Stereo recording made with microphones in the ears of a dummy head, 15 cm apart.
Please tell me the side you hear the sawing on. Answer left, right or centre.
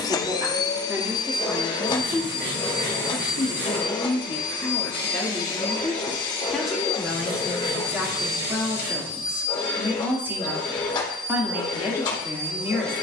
right.